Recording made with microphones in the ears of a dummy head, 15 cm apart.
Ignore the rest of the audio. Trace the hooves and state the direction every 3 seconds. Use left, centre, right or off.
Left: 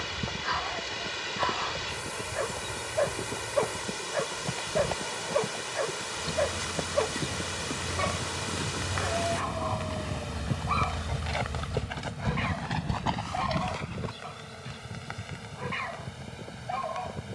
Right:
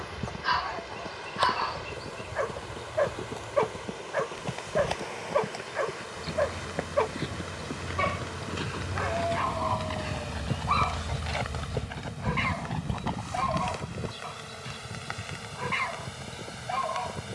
right, right, right, right, left, off.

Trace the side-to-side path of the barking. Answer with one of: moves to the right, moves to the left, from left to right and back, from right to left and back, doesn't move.
doesn't move.